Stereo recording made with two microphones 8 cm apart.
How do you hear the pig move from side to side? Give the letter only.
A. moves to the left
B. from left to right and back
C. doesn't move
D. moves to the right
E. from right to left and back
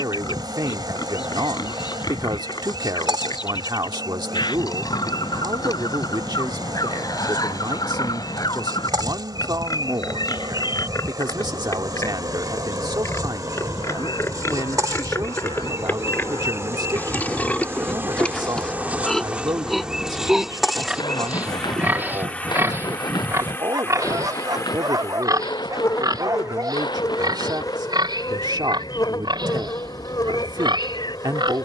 D.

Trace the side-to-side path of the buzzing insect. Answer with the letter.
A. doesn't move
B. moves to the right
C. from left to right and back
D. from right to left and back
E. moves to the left
E.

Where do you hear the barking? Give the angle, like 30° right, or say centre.
50° right.